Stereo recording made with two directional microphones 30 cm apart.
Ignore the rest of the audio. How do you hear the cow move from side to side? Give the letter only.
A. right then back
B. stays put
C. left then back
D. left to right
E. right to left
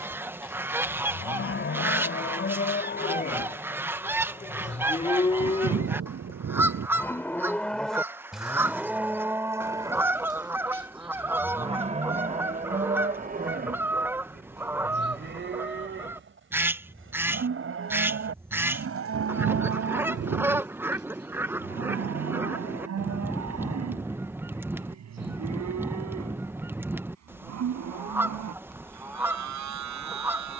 D.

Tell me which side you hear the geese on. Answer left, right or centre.
centre.